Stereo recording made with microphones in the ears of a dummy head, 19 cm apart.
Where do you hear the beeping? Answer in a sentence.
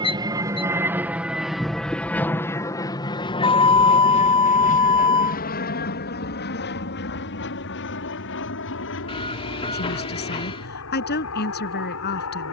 You can hear the beeping on the left.